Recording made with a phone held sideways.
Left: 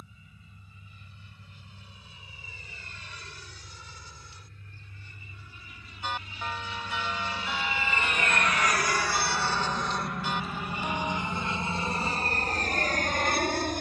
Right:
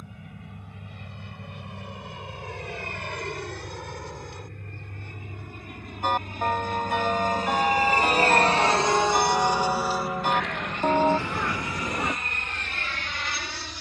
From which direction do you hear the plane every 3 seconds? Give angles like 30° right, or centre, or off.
80° right, 70° right, 40° right, centre, 40° left.